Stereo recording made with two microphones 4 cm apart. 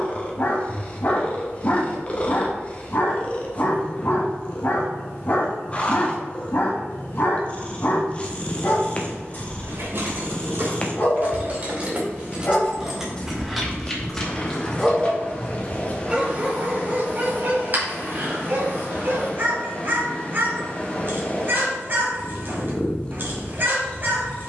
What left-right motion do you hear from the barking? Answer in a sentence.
You can hear the barking go from the left side to the right.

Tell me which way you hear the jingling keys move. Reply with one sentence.
In this clip you hear the jingling keys move from right to left.